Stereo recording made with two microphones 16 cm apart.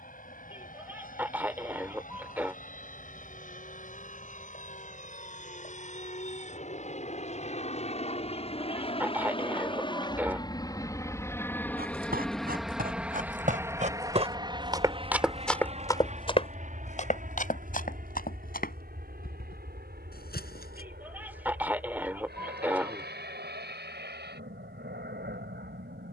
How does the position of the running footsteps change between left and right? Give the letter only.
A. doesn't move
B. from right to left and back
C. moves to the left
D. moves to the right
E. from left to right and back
C.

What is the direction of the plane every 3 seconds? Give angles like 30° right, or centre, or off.
60° left, 60° left, 50° left, 20° left, 10° right, 50° right, 60° right, 70° right, 80° right.